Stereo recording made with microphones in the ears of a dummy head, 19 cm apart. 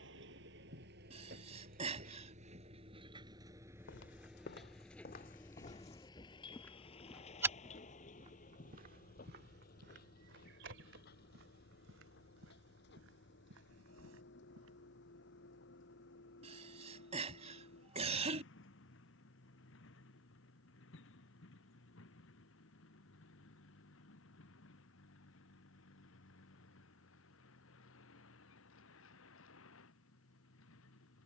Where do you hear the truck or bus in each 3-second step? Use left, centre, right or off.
right, centre, left, left, left, left, left, left, left, left, left.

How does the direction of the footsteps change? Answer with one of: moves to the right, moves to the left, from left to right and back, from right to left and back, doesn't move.
moves to the right.